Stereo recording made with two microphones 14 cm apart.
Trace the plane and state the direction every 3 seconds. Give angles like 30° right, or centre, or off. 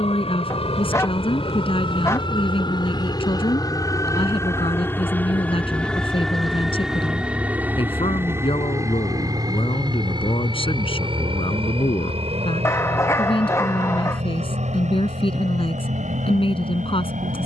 40° left, 20° left, 10° right, 30° right, 50° right, 60° right.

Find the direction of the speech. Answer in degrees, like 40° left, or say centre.
40° left.